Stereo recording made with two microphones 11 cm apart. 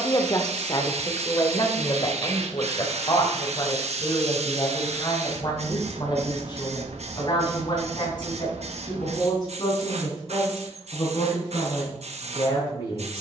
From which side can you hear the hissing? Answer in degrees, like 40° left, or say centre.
80° right.